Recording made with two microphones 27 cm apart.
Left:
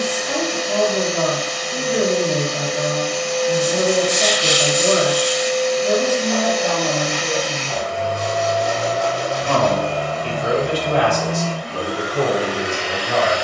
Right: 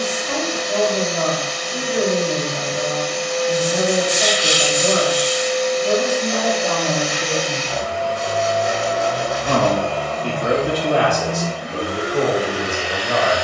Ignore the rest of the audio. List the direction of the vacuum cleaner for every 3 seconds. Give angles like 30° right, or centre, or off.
70° left, 70° left, 60° left, centre, 30° right.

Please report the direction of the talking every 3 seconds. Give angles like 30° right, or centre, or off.
30° left, 30° left, 10° left, 60° right, 70° right.